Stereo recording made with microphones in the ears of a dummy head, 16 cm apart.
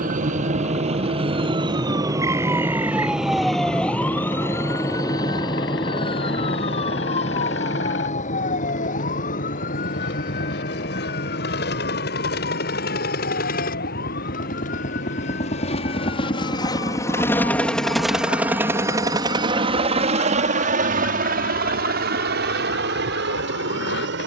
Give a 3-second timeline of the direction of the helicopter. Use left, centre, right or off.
left, left, left, left, left, left, right, right.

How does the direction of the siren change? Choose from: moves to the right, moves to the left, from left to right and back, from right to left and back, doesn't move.
moves to the left.